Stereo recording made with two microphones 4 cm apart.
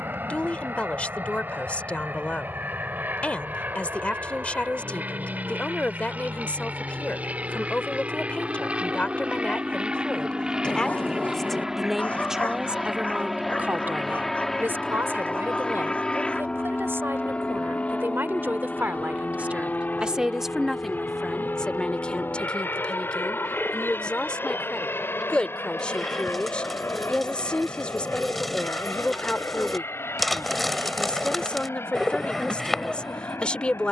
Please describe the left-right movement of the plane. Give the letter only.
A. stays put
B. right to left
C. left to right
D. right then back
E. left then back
B.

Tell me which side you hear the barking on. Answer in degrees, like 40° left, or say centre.
40° left.